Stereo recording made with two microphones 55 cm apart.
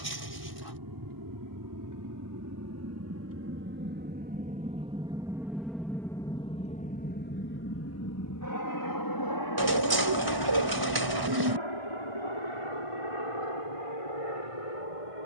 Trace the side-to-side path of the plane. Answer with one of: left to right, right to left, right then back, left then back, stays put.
right to left.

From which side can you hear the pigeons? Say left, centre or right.
right.